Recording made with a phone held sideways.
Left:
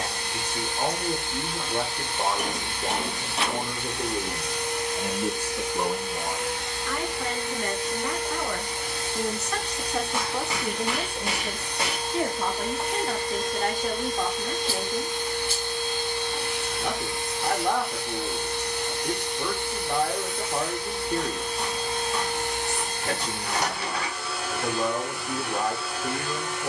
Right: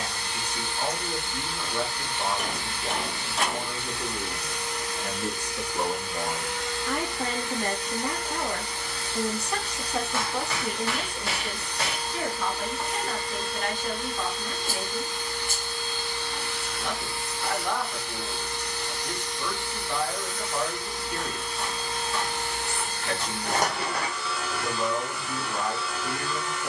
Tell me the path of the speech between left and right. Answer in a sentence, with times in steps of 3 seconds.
You can hear the speech on the left from 0 s, on the right from 6 s, in the centre from 9 s and on the left from 12 s.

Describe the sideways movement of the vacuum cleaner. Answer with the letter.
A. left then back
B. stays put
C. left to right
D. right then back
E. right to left
B.